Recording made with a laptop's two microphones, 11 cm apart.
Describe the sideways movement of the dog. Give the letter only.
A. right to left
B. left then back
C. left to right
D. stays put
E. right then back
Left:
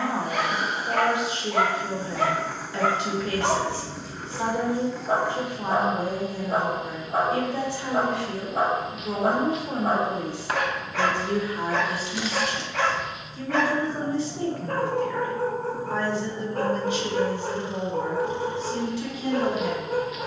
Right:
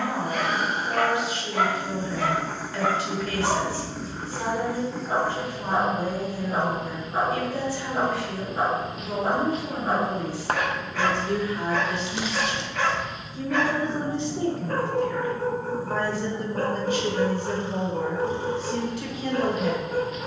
D.